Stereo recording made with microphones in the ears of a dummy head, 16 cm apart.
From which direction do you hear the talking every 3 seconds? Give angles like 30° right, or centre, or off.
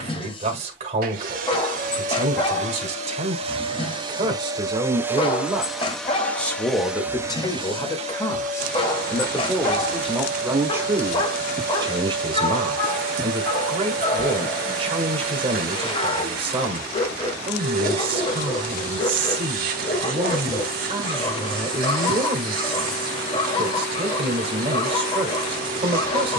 40° right, 30° right, 20° left, 10° right, 30° right, 30° right, 30° right, 30° right, 30° right.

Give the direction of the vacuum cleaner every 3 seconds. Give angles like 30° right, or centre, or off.
50° right, 20° right, 20° right, 50° right, 50° right, 50° right, 50° right, 50° right, 50° right.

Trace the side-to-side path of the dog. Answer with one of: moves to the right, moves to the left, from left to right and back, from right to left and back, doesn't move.
doesn't move.